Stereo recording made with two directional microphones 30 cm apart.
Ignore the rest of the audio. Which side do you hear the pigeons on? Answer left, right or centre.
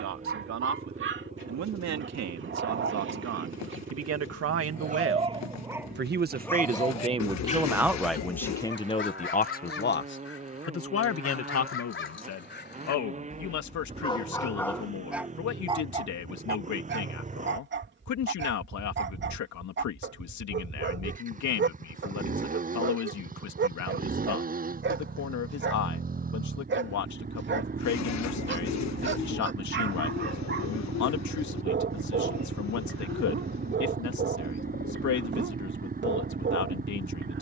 left.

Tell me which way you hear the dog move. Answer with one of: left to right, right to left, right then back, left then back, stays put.
left then back.